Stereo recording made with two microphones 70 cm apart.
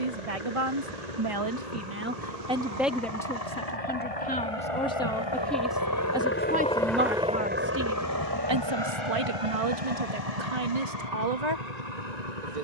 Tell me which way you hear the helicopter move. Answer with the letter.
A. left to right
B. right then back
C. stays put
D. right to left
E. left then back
A.